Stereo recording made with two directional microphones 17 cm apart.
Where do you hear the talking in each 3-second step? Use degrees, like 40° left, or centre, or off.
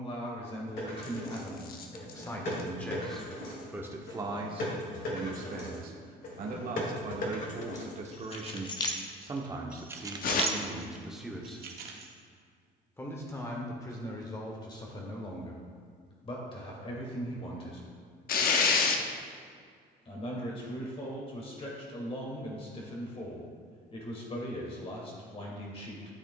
20° left, 30° right, 50° right, 10° right, 20° left, 30° left, 30° left, 30° left, 30° left.